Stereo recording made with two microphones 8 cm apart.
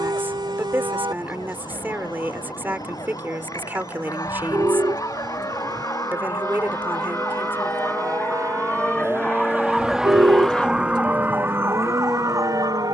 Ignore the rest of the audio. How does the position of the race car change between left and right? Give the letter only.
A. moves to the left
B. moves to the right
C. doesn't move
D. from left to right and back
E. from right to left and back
A.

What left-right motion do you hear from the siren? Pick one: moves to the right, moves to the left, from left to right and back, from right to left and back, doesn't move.
moves to the right.